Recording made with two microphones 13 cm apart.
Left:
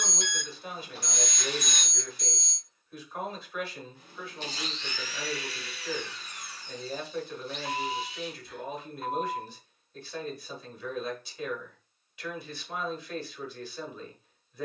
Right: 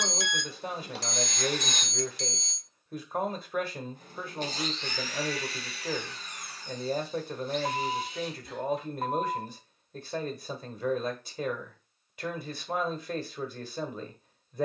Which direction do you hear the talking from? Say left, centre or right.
right.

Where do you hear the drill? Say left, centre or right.
right.